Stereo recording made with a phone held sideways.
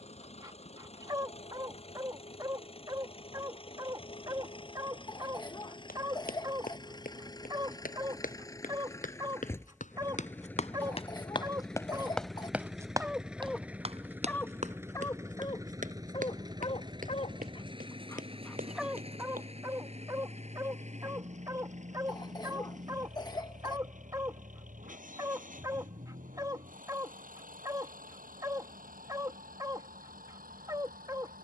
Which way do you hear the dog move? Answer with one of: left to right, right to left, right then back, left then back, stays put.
left then back.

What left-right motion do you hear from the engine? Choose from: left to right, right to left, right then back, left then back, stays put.
left to right.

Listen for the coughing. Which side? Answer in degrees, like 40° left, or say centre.
30° left.